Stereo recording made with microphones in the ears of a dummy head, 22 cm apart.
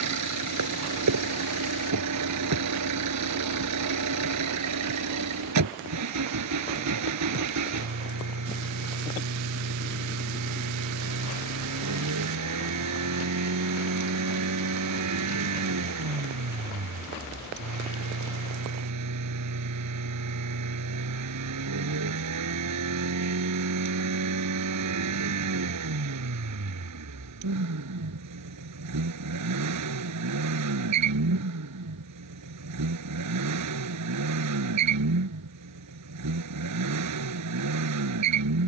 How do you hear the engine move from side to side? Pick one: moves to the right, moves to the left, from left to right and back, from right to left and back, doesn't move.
doesn't move.